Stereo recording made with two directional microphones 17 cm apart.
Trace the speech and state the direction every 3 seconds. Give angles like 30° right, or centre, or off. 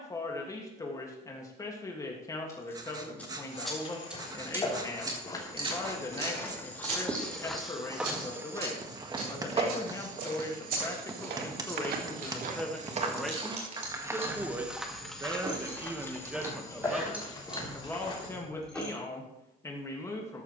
20° left, 20° left, 20° left, 20° left, centre, 10° right, 20° left.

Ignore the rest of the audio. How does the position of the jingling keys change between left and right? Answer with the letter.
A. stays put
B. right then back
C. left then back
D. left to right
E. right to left
B.